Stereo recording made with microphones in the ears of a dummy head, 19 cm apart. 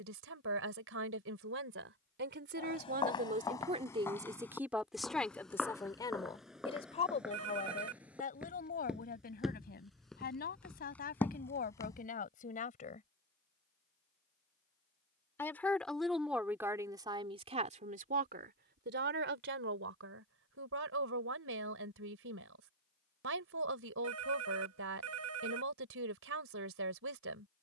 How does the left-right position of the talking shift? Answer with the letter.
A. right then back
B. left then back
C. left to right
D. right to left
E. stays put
B.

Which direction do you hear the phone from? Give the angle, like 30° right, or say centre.
70° right.